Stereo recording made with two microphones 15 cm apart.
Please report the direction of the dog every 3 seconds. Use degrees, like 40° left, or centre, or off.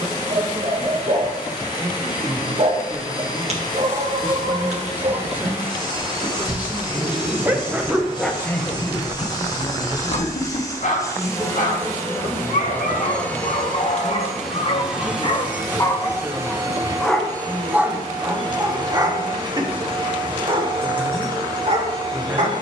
50° right, 50° right, 10° right, 50° left, 50° left, 20° left, 30° right, 50° right.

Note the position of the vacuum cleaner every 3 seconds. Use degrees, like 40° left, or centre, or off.
30° left, 30° left, 30° left, 30° left, 10° left, 20° right, 30° right, 30° right.